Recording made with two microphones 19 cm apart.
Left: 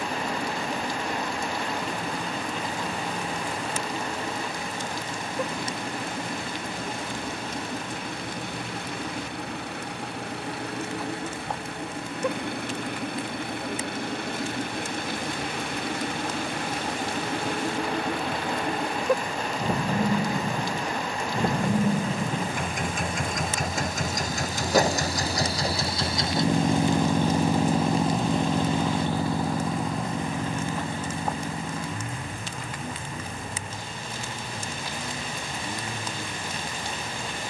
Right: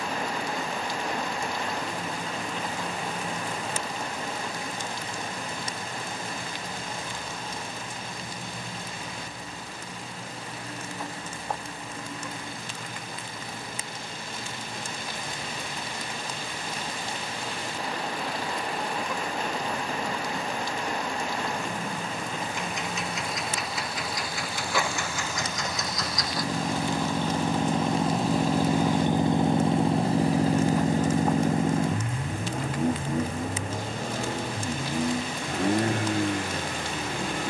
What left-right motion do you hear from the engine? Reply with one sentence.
You can hear the engine go from the left side to the right.